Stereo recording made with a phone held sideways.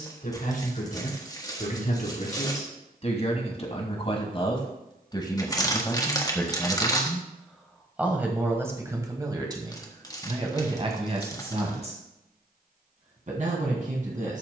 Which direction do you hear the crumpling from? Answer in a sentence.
In this clip you hear the crumpling on the left.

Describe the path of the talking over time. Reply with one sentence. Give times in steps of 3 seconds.
You can hear the talking on the left from 0 s, in the centre from 6 s and on the right from 9 s.